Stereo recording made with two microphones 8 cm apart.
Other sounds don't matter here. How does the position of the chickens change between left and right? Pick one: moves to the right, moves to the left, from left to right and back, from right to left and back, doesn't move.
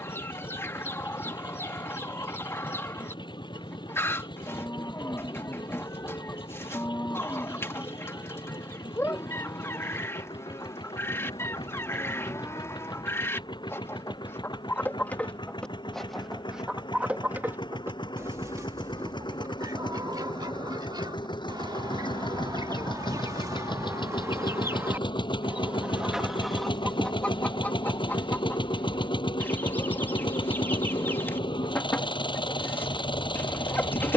from left to right and back.